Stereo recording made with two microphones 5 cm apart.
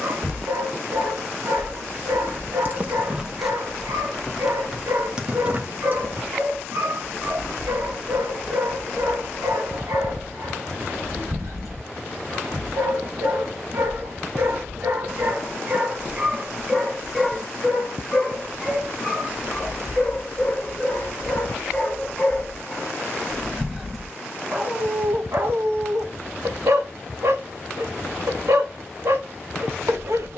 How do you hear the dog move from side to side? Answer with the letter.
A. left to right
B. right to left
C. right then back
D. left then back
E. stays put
D.